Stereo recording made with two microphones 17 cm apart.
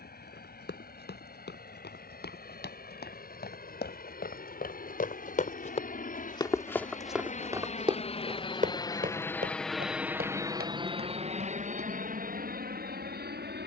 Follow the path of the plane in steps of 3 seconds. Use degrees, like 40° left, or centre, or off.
70° left, 70° left, 40° left, 20° right, 60° right.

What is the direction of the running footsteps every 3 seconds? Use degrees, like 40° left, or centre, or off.
80° left, 60° left, 20° right, 60° right, off.